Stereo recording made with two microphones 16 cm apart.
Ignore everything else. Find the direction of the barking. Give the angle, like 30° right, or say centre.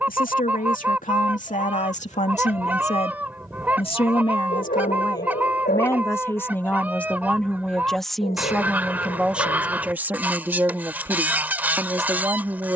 70° left.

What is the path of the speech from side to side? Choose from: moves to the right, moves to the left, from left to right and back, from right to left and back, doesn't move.
moves to the right.